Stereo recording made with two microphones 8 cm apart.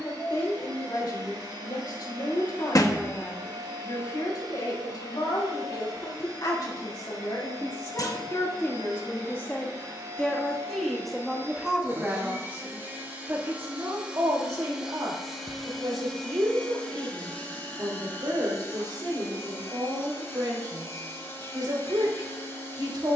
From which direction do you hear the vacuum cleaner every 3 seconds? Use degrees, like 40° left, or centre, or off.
60° right, 60° right, 60° right, 40° right, 20° right, 10° left, 30° left, 30° left.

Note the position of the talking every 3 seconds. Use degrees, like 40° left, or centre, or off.
60° left, 60° left, 50° left, 10° left, 30° right, 60° right, 60° right, 60° right.